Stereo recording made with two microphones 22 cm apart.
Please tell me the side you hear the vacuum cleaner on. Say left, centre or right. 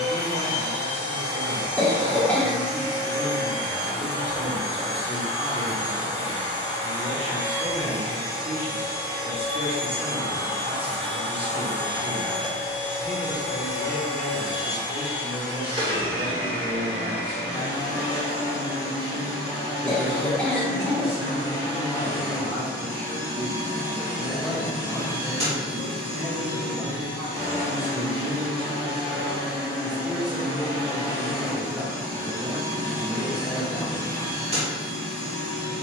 right.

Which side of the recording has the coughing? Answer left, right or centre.
centre.